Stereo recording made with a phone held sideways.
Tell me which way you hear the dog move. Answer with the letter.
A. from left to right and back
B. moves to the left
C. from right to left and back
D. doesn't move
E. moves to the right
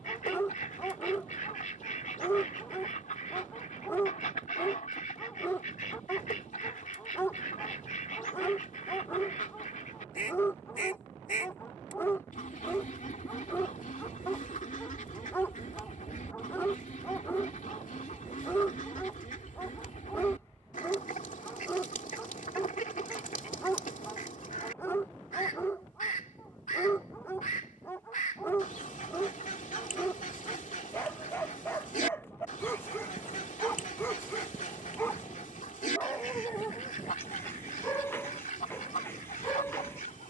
D.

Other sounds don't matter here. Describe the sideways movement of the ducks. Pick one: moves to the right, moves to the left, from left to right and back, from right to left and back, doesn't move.
doesn't move.